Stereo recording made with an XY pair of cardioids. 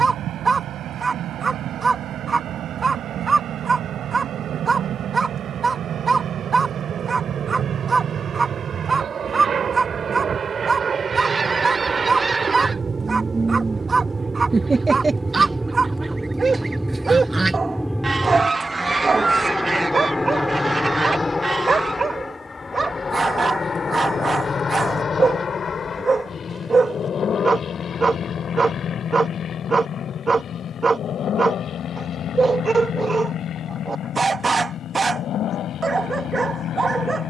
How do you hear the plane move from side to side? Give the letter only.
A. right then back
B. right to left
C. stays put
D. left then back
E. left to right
B.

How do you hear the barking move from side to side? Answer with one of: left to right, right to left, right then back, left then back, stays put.
stays put.